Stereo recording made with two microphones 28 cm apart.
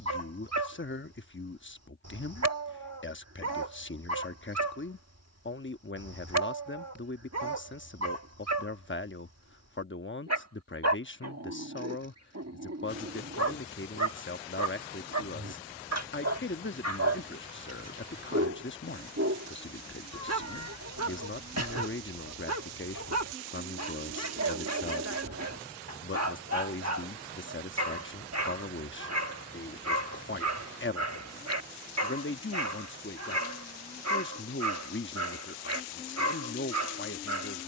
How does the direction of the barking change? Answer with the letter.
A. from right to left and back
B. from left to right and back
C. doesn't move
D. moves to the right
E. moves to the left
C.